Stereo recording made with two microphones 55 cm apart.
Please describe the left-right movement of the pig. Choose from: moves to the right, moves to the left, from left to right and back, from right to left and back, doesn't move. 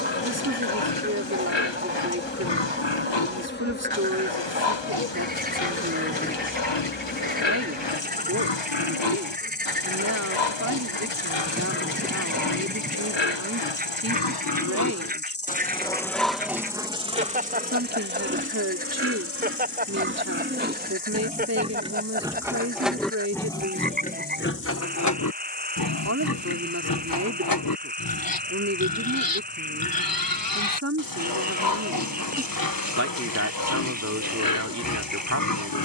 from left to right and back.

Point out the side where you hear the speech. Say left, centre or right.
right.